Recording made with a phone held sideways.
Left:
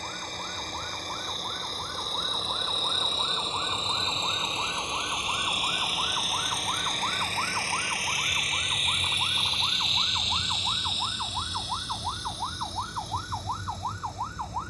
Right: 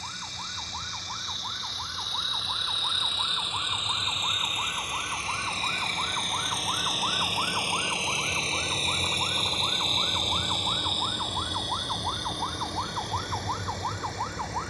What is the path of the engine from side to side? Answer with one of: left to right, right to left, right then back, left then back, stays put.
left to right.